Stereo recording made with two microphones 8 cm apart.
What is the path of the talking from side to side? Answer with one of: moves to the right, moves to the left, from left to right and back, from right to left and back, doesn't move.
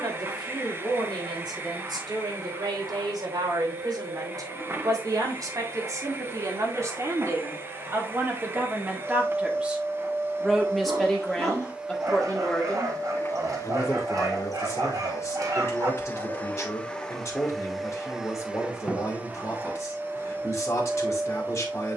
moves to the left.